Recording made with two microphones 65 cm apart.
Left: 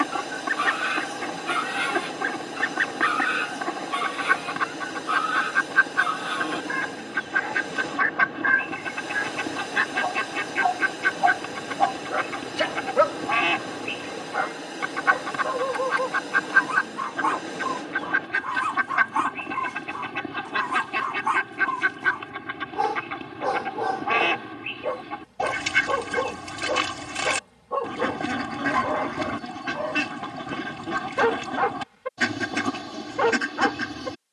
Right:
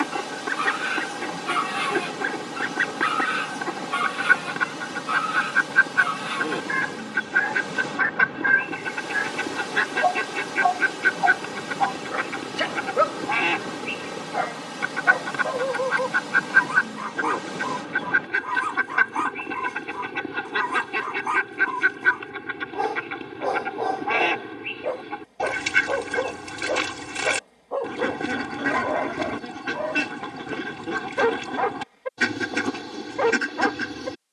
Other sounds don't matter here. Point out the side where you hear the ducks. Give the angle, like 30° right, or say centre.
10° left.